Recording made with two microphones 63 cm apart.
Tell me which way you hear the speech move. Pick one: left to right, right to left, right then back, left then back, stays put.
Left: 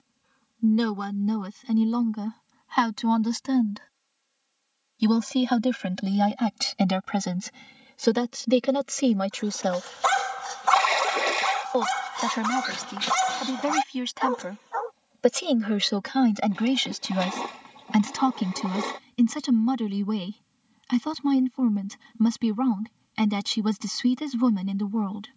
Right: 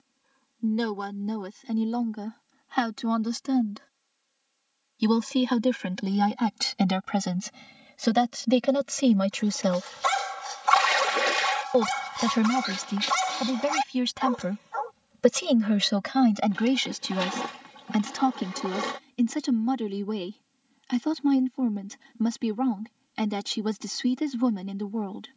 right then back.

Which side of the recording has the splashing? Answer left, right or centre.
right.